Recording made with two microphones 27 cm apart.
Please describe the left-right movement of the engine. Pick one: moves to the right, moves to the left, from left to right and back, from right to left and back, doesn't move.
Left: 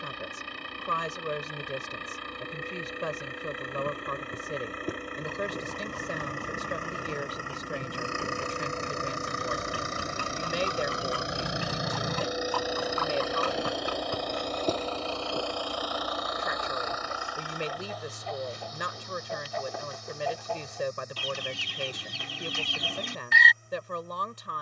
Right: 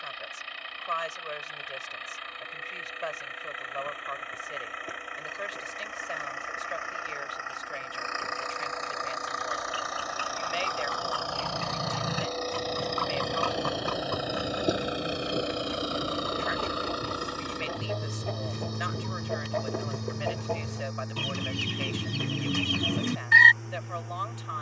moves to the right.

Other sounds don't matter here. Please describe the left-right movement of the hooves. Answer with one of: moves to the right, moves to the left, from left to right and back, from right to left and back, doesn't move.
moves to the right.